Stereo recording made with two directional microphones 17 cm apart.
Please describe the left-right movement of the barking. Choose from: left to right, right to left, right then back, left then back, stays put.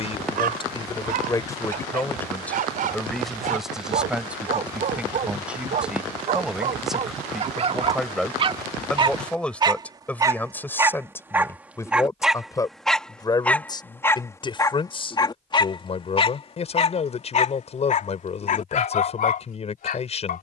right to left.